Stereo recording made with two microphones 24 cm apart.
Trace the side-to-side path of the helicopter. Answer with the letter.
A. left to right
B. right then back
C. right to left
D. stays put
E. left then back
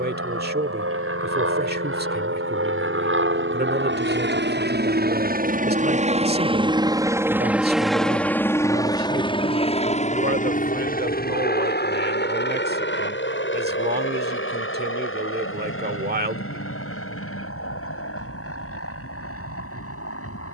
C.